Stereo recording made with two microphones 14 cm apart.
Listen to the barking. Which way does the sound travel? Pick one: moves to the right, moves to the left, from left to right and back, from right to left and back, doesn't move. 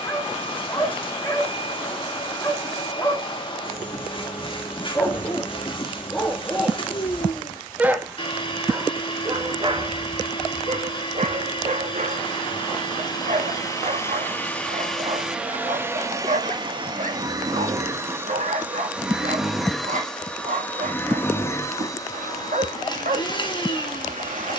moves to the right.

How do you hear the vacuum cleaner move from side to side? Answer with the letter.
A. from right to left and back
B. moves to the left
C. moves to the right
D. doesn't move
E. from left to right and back
E.